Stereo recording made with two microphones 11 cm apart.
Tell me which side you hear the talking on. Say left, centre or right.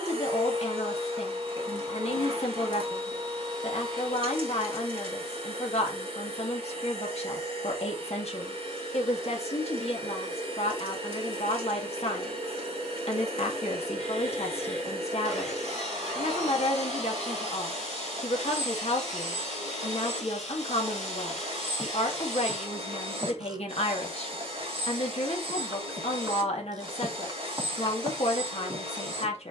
left.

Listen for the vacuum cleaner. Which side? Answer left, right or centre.
right.